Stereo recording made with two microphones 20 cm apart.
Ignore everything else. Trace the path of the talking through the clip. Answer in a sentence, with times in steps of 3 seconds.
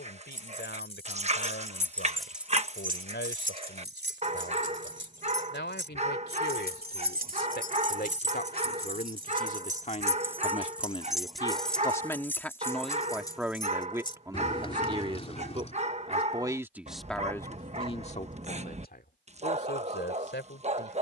In this clip you hear the talking on the left from 0 s, in the centre from 12 s and on the left from 18 s.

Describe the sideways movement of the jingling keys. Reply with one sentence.
You can hear the jingling keys move from left to right and back again.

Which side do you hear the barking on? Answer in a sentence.
In this clip you hear the barking on the right.